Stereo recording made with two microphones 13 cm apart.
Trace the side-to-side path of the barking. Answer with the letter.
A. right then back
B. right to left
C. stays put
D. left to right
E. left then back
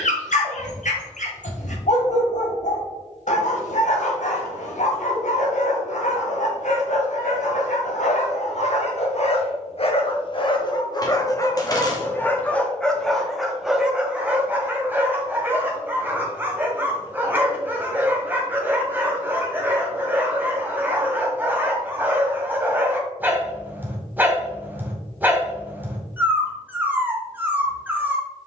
D.